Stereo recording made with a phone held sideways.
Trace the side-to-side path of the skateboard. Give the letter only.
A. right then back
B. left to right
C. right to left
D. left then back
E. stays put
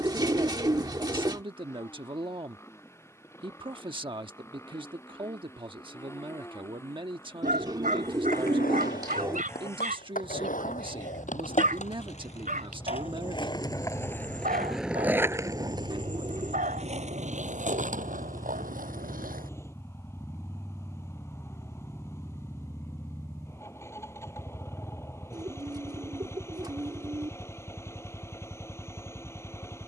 B.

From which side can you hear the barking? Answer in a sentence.
You can hear the barking on the right.